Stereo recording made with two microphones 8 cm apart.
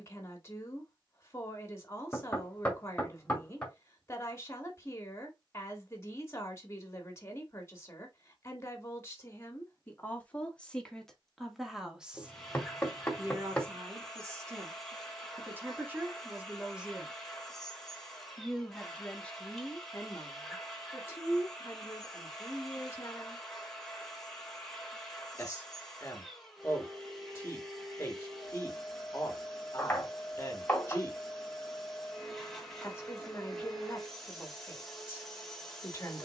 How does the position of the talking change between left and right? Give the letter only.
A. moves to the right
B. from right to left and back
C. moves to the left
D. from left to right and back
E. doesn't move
D.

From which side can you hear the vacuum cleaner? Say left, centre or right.
centre.